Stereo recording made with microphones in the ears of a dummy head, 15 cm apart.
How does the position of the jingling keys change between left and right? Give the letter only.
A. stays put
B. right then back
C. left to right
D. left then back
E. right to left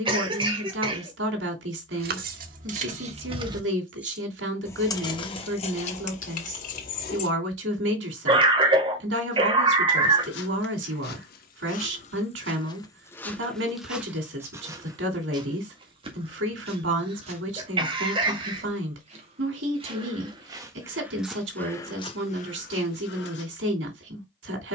E.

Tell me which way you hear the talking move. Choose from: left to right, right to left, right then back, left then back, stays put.
stays put.